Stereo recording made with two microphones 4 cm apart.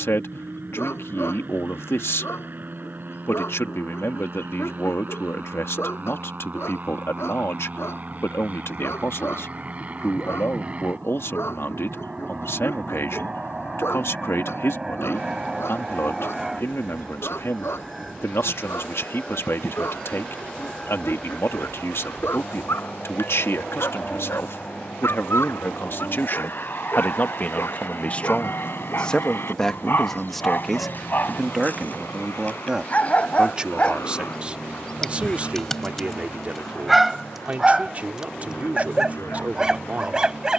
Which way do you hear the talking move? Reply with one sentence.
In this clip you hear the talking move from left to right.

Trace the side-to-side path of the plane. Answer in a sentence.
You can hear the plane travel towards the left.